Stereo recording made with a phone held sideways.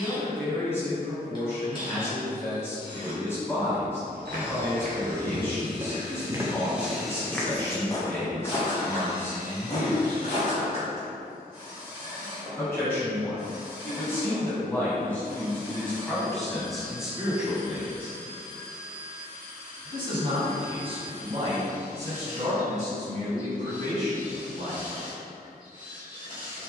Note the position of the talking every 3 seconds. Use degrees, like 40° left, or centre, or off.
20° left, 20° left, 20° left, 20° left, 20° left, centre, 30° right, 50° right, 60° right.